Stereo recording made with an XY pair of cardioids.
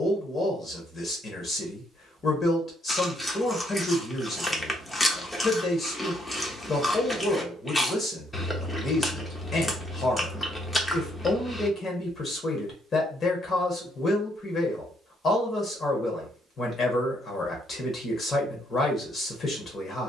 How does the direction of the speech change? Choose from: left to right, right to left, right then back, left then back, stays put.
stays put.